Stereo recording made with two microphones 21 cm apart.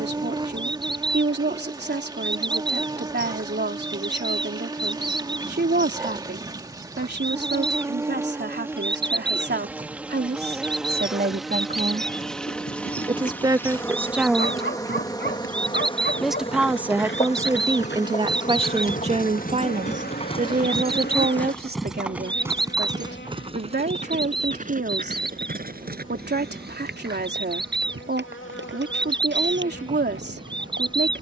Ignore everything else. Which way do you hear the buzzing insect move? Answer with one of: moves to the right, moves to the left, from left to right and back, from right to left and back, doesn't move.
moves to the left.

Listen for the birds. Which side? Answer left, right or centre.
right.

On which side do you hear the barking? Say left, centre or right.
left.